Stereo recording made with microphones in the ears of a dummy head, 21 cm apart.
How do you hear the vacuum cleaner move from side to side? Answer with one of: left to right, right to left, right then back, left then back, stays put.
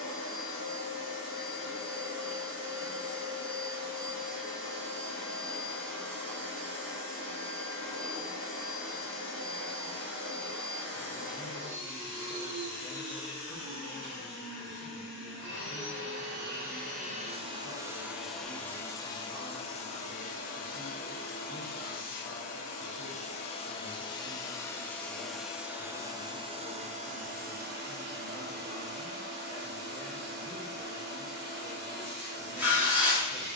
left then back.